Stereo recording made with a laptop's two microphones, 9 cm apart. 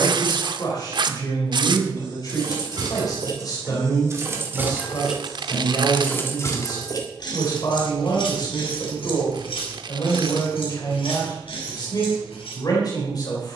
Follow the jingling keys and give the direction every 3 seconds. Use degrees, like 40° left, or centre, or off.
50° right, 20° right, 50° left, 80° left, 80° left.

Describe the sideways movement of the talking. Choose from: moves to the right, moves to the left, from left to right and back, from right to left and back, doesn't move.
doesn't move.